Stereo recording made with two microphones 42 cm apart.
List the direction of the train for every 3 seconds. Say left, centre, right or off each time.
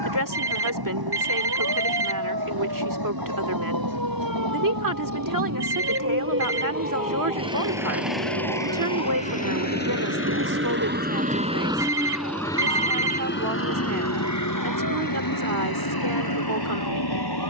right, right, right, right, left, left.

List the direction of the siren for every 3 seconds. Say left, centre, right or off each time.
right, right, centre, left, left, left.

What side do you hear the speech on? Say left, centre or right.
right.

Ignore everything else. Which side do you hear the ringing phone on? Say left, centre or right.
right.